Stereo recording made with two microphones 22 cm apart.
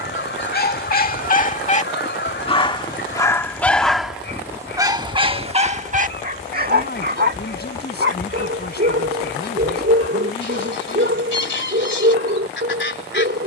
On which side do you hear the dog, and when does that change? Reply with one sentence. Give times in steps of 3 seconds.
You can hear the dog on the left from 0 s, in the centre from 3 s and on the right from 6 s.